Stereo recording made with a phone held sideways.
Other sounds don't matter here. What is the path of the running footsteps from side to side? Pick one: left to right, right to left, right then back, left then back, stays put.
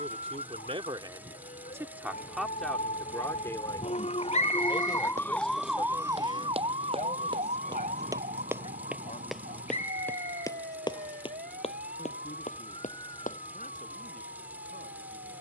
right to left.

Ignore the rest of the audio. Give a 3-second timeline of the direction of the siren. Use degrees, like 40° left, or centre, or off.
70° left, 30° left, 50° right, 70° right, 80° right.